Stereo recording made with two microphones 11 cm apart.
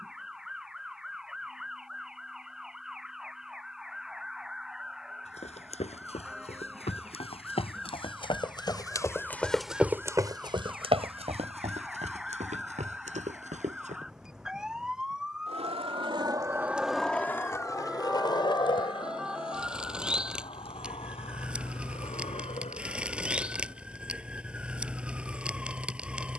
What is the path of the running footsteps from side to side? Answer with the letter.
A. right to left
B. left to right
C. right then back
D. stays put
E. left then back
B.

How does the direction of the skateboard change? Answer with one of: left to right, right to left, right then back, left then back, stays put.
right to left.